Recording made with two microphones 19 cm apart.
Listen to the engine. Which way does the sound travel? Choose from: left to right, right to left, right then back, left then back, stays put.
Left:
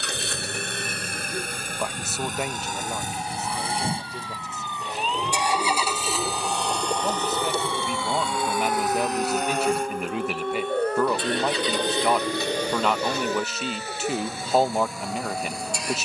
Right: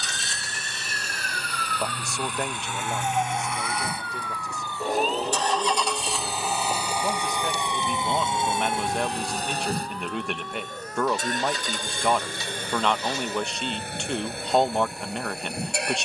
left to right.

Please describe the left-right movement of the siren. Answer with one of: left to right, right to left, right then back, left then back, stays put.
right to left.